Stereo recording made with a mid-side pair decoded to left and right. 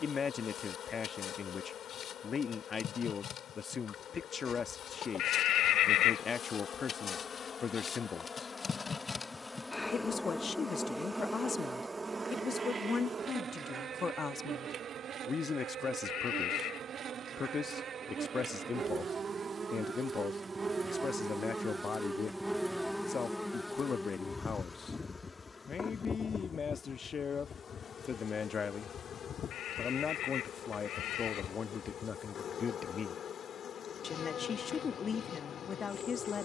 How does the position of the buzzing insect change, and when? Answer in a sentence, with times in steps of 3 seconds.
You can hear the buzzing insect on the left from 0 s, in the centre from 9 s, on the right from 12 s, in the centre from 21 s and on the left from 24 s.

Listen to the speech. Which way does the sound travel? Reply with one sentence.
In this clip you hear the speech stay in one place.